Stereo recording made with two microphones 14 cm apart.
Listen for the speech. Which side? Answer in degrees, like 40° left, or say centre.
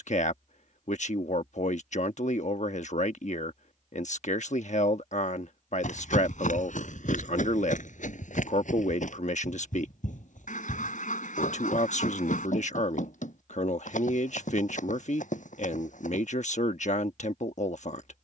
60° left.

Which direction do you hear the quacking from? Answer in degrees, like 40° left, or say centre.
70° left.